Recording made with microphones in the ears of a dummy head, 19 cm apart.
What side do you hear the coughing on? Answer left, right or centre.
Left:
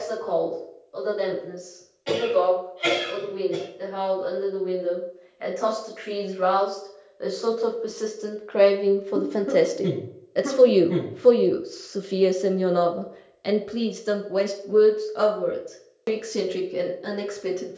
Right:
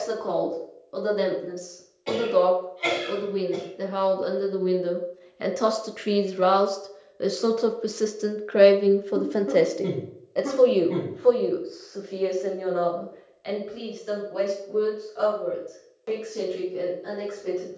centre.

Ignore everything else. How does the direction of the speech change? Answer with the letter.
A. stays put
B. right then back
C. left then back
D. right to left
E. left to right
D.